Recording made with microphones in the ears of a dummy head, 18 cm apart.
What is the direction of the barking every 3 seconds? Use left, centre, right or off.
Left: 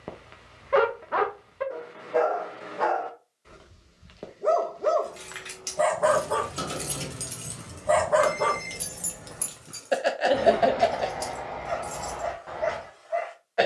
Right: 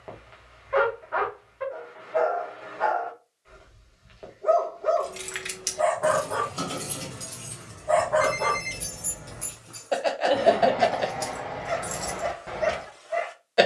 left, left, left, centre, right.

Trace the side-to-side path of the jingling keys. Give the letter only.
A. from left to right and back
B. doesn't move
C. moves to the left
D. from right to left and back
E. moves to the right
D.